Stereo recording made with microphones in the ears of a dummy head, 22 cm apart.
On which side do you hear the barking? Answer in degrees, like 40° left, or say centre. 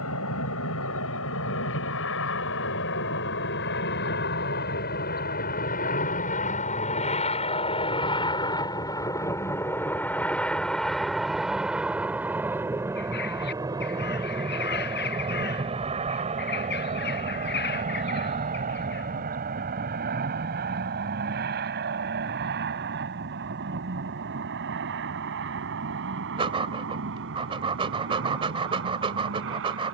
20° right.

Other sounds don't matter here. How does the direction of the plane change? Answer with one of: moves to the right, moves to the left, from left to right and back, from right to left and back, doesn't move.
moves to the right.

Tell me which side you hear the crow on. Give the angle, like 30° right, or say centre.
50° left.